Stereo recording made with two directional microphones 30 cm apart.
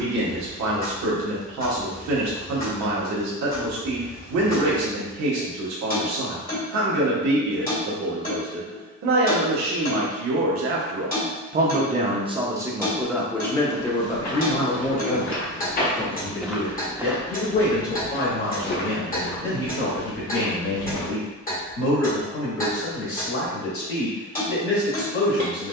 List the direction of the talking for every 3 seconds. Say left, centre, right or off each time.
right, right, right, right, centre, left, left, left, left.